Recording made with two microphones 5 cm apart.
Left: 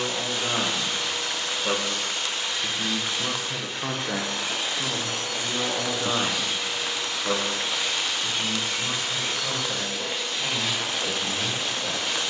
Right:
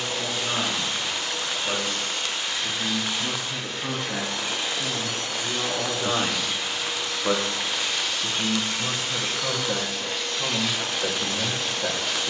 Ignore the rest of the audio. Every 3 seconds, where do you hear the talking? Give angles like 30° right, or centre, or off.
70° left, 40° left, 20° right, 50° right.